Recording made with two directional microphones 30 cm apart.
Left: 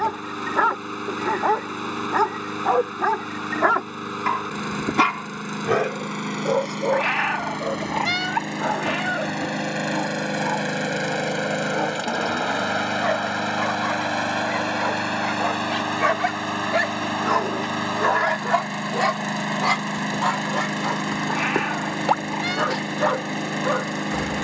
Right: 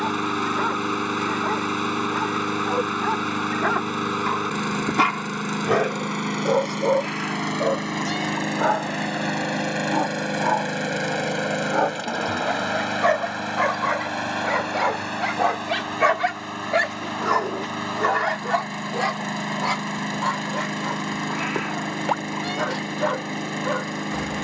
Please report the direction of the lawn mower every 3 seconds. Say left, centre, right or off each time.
right, right, right, centre, left, left, left, left.